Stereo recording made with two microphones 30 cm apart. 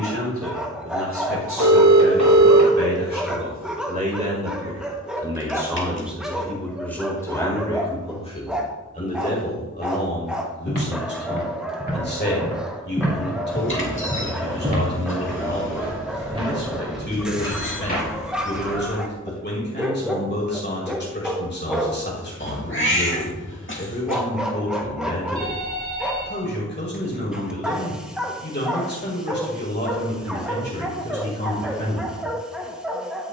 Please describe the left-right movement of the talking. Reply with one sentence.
You can hear the talking move from right to left.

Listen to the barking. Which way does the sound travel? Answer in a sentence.
You can hear the barking stay in one place.